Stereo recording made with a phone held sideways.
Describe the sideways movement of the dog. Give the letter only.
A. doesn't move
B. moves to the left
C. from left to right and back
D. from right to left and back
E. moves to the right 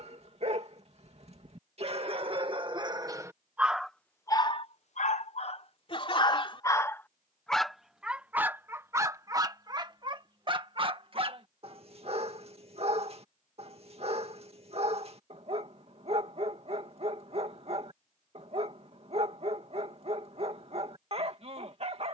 D.